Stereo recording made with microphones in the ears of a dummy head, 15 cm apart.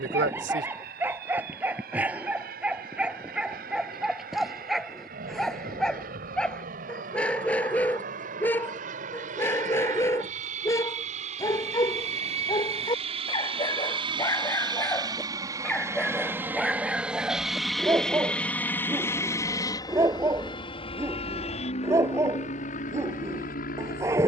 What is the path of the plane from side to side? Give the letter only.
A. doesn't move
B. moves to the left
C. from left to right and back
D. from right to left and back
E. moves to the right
B.